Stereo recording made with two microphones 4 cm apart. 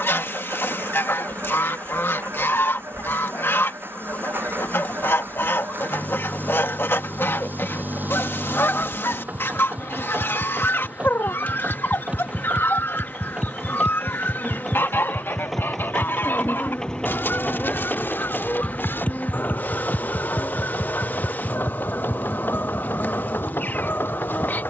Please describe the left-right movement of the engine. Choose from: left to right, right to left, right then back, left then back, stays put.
right to left.